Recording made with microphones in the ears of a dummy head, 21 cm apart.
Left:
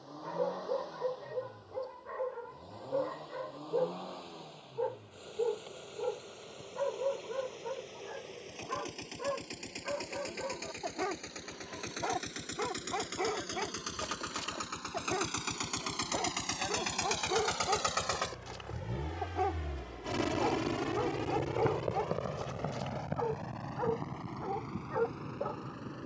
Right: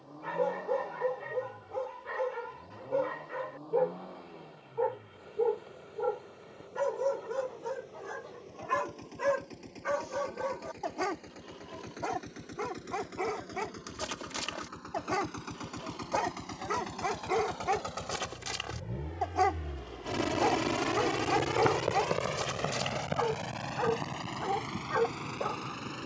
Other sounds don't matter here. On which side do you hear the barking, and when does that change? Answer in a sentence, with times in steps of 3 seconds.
In this clip you hear the barking on the right from 0 s, in the centre from 12 s and on the right from 15 s.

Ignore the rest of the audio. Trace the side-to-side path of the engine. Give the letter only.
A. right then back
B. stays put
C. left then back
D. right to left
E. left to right
E.